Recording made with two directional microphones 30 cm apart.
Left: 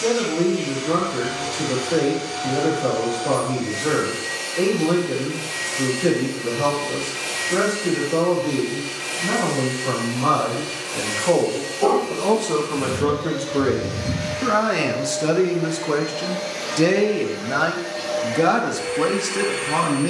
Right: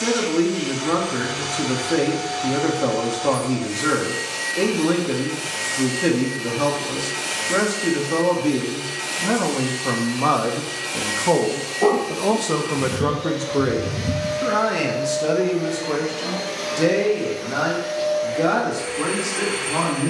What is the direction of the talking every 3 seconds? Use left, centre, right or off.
right, right, right, right, centre, left, left.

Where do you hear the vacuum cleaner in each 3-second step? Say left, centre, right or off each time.
right, right, right, right, right, centre, centre.